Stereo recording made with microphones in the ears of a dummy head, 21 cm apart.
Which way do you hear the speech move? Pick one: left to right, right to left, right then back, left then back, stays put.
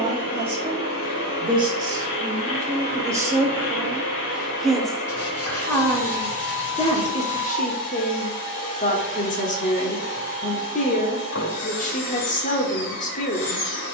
right to left.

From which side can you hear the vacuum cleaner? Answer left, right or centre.
left.